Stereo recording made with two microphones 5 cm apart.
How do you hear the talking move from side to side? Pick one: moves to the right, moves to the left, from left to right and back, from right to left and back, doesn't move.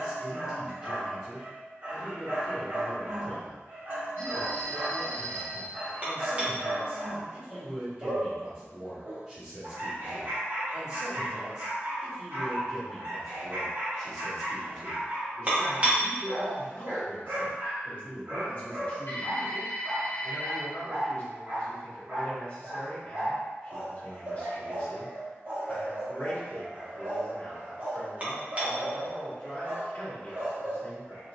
moves to the left.